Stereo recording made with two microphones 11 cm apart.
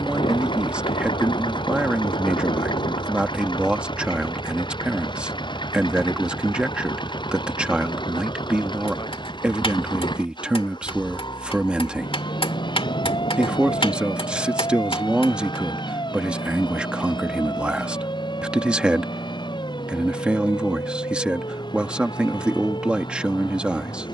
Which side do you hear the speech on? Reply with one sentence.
In this clip you hear the speech in the centre.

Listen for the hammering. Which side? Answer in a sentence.
In this clip you hear the hammering on the left.